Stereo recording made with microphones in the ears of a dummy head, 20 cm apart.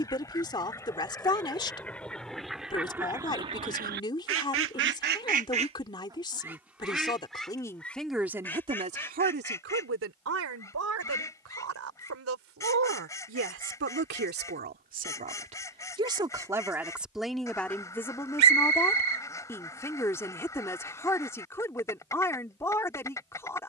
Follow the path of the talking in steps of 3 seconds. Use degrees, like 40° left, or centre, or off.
20° left, 20° left, 10° left, 60° right, 50° right, 10° right, 10° left, 10° left.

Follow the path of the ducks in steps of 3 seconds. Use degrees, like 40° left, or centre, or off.
10° left, 40° right, centre, 10° left, 10° left, 10° left, 10° left, 10° left.